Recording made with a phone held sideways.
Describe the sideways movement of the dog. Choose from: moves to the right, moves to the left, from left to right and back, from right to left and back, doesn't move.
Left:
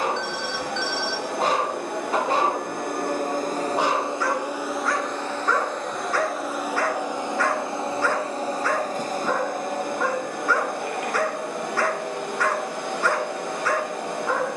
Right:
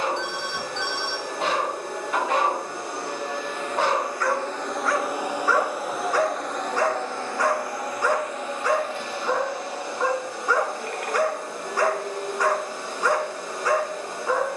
moves to the right.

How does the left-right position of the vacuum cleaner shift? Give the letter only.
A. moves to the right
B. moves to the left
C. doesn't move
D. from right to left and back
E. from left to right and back
E.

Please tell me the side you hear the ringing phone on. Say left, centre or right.
right.